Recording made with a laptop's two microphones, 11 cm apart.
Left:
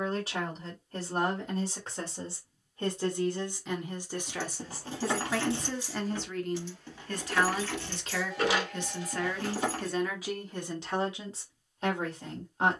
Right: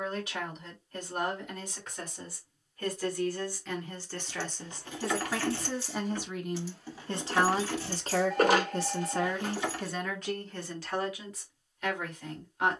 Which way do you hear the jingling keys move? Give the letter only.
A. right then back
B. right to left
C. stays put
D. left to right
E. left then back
A.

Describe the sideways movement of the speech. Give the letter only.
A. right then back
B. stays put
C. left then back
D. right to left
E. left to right
A.